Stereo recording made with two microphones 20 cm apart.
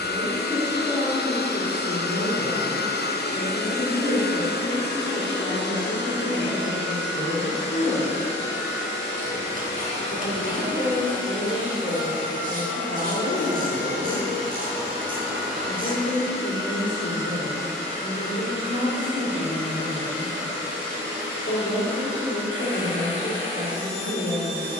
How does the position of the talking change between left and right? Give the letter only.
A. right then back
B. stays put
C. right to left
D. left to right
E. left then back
B.